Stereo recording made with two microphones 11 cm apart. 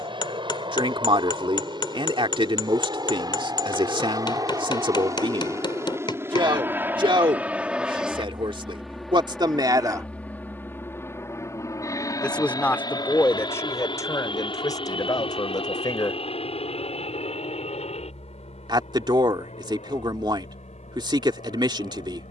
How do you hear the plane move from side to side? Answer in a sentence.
In this clip you hear the plane move to the left.